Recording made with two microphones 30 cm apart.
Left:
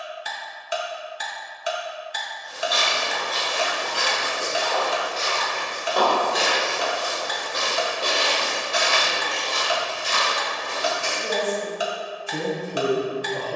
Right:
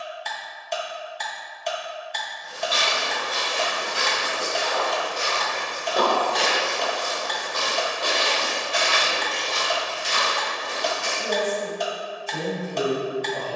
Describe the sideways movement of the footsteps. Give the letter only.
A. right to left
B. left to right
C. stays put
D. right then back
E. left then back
A.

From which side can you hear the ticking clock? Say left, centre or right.
centre.